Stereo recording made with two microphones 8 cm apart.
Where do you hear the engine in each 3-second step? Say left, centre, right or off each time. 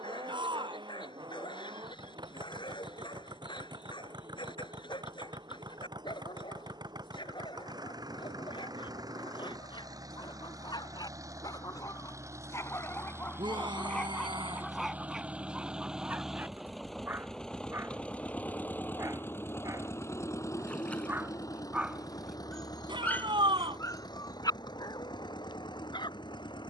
right, right, right, right, right, centre, left, left, left.